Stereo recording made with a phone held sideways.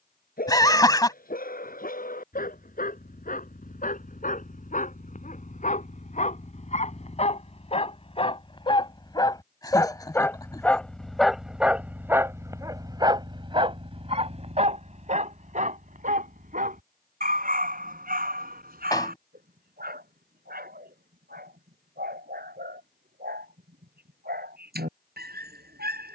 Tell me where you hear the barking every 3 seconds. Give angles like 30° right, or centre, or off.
60° left, 60° left, 40° left, 10° left, 30° right, 60° right, 70° right, 80° right, 80° right.